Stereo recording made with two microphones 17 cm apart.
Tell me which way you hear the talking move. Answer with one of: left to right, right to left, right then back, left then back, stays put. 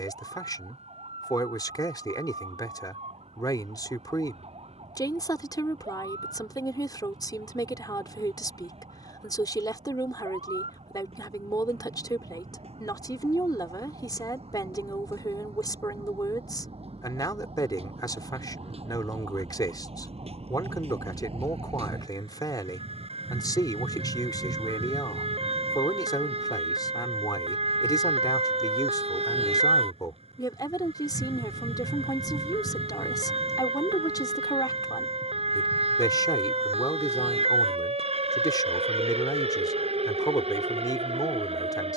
stays put.